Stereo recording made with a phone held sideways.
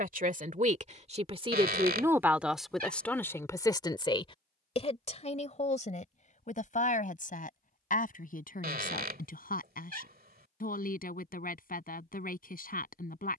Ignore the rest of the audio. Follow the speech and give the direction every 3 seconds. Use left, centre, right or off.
right, left, left, left, left.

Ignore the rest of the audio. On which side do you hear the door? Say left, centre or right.
right.